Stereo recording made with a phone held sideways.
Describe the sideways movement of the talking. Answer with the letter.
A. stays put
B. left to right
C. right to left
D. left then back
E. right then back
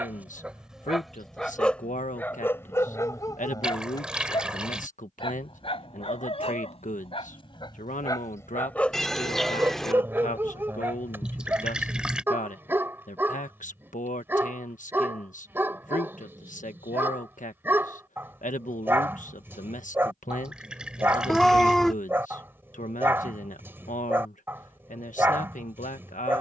A.